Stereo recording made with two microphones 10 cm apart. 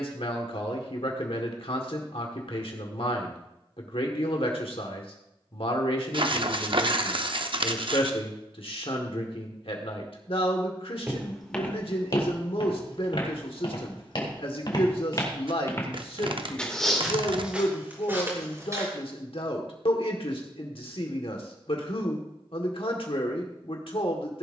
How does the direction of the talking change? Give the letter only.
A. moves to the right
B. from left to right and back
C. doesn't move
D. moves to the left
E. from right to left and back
C.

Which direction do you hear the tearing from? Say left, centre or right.
right.